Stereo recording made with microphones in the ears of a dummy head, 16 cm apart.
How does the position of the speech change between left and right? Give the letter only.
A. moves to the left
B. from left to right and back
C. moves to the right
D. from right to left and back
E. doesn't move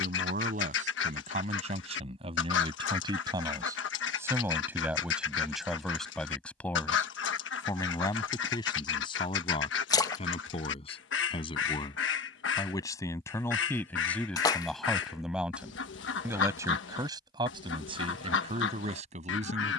D.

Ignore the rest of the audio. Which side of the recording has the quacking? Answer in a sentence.
You can hear the quacking on the left.